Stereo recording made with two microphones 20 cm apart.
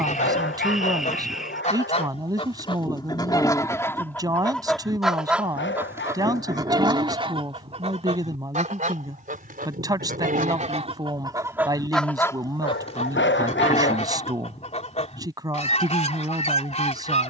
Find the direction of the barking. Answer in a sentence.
You can hear the barking on the left.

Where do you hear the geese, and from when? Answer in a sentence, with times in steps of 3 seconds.
You can hear the geese on the left from 0 s, in the centre from 3 s, on the right from 6 s and on the left from 12 s.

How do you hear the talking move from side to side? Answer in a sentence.
You can hear the talking stay in one place.